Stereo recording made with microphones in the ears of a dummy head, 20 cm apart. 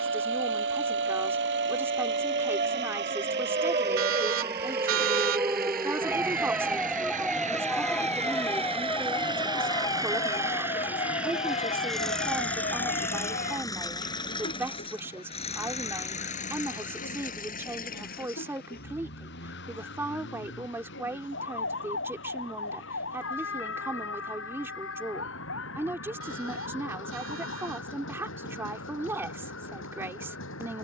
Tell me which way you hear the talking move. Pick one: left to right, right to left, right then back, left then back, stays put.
stays put.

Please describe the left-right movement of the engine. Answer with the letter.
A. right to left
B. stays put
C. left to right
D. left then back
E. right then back
A.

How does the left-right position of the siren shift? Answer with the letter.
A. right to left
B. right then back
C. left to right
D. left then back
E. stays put
A.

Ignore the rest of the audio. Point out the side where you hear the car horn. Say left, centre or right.
right.